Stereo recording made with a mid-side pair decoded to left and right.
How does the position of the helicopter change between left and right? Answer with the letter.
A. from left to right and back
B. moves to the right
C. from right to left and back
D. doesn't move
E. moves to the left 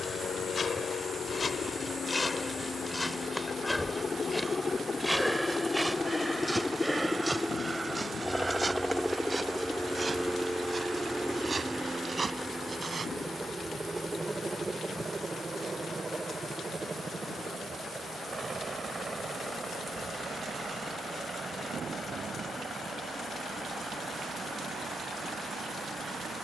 B.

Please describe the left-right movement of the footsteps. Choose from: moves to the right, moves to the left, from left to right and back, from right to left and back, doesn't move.
moves to the right.